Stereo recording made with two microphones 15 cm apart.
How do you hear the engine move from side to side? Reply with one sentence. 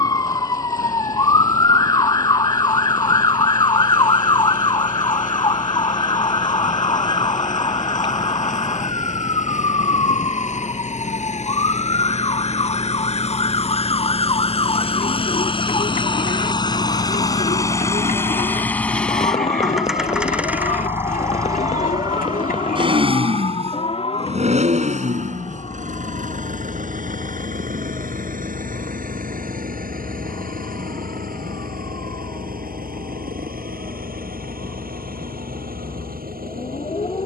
You can hear the engine travel towards the right.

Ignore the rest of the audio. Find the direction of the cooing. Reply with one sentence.
You can hear the cooing on the left.